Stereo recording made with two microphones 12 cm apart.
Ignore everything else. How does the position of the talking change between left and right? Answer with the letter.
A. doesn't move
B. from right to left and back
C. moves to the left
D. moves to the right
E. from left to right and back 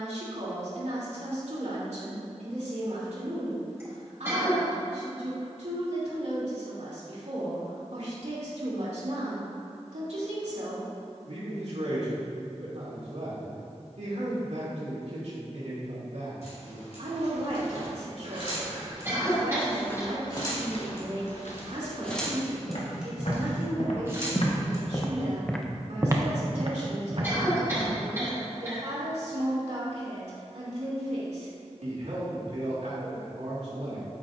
A.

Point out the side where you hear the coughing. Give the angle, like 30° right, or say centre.
20° right.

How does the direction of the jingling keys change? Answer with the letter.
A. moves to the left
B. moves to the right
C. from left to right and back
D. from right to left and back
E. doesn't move
B.